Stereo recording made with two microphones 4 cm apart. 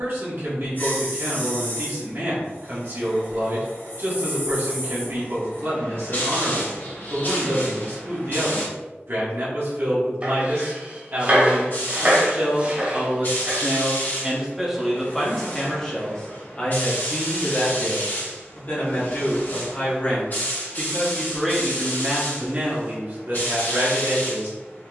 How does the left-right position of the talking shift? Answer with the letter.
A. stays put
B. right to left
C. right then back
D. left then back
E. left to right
D.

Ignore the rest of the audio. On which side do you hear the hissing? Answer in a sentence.
You can hear the hissing on the left.